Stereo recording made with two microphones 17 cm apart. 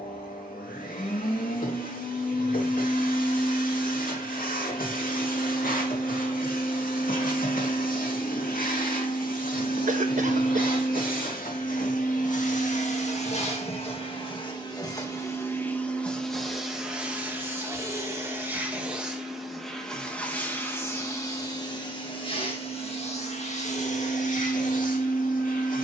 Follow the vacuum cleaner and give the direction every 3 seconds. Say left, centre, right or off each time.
left, left, left, left, left, centre, centre, left, left.